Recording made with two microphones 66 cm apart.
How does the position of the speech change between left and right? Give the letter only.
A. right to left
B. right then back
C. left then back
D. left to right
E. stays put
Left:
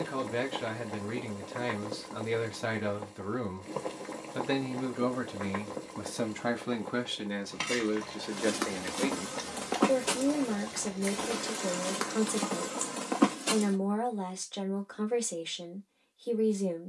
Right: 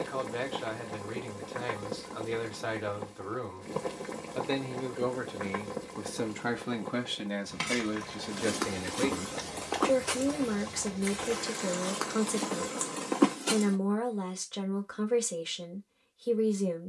D.